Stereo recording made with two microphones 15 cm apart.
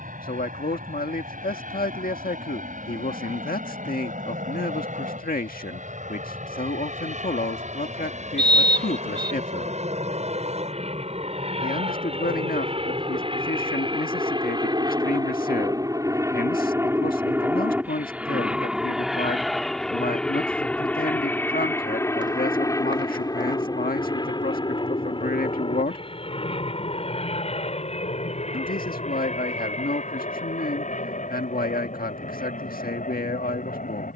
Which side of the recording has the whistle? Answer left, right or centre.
right.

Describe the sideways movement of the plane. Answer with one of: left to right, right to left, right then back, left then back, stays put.
right to left.